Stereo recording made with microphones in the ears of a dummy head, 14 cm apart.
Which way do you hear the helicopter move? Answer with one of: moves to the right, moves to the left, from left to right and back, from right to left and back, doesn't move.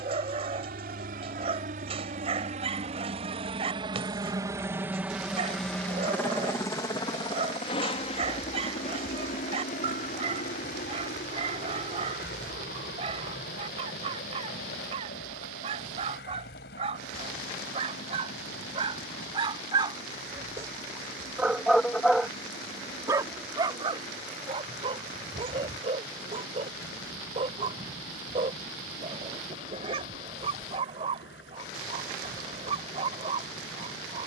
moves to the left.